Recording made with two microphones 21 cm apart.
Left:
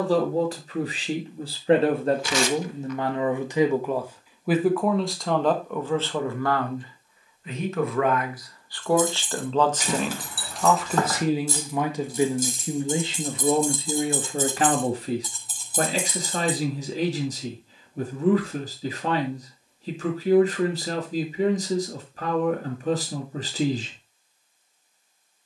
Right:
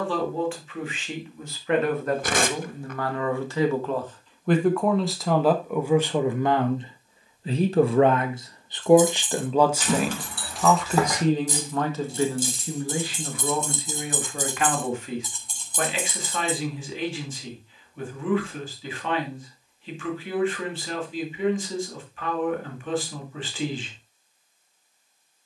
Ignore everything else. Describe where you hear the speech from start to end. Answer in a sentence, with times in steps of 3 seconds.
In this clip you hear the speech on the left from 0 s, in the centre from 3 s, on the right from 6 s, in the centre from 9 s, on the left from 12 s and not at all from 24 s.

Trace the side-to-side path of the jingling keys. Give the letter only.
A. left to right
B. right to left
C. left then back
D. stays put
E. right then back
E.